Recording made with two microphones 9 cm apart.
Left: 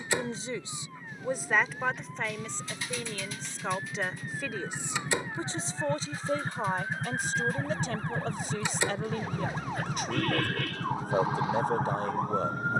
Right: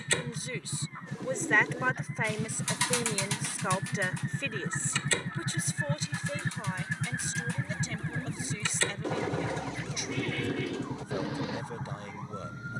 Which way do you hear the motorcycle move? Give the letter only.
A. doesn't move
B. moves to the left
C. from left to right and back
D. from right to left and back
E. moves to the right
B.